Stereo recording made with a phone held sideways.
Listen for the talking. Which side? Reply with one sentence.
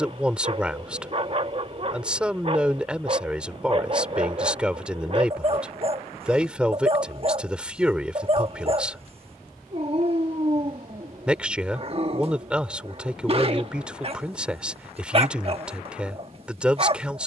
You can hear the talking in the centre.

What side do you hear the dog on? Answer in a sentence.
You can hear the dog on the right.